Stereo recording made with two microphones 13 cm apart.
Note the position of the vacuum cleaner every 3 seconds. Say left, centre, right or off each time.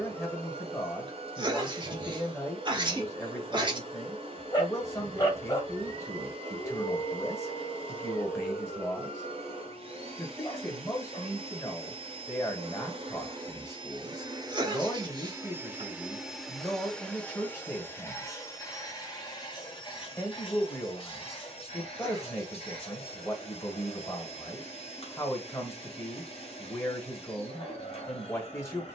right, right, right, right, right, centre, left, left, left, left.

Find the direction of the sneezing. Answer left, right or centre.
right.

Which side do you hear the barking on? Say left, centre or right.
left.